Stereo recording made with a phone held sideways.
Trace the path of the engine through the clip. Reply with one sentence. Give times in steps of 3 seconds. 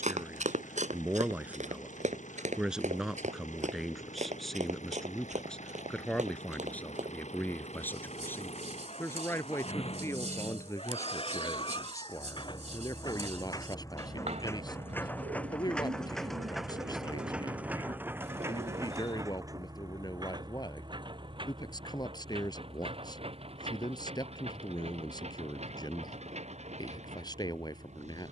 In this clip you hear the engine on the left from 0 s, in the centre from 15 s and on the right from 18 s.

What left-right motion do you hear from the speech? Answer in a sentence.
You can hear the speech travel towards the left.